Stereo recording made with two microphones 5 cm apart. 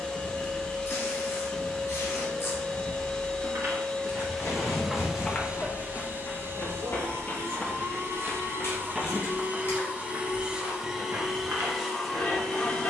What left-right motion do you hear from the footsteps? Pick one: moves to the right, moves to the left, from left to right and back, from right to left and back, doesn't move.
from right to left and back.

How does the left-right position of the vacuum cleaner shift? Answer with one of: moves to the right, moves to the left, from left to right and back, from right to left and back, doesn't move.
from left to right and back.